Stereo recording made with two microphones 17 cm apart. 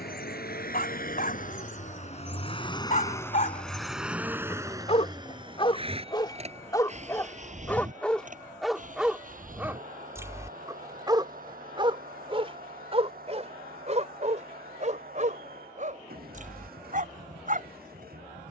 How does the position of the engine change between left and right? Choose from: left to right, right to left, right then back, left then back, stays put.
left to right.